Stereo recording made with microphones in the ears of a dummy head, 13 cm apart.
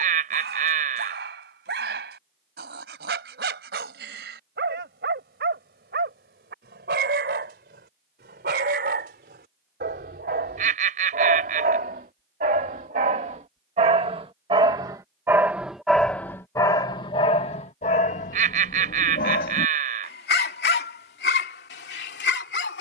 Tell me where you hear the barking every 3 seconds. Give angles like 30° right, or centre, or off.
80° right, 70° right, 70° right, 60° right, 40° right, 20° left, 60° left, 80° left.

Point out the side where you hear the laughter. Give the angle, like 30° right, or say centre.
50° right.